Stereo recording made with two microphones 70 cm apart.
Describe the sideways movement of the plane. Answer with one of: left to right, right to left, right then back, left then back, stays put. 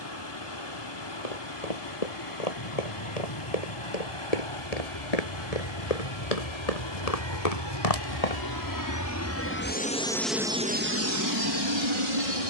left to right.